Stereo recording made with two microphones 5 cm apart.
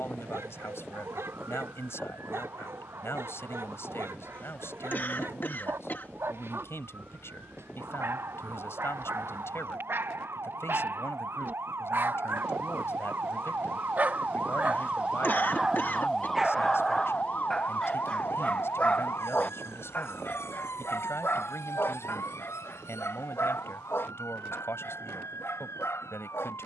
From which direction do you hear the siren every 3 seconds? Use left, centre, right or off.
right, right, right, right, right, centre, left, left, left.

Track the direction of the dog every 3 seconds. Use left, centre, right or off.
right, right, right, right, right, centre, left, left, left.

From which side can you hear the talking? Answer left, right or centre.
left.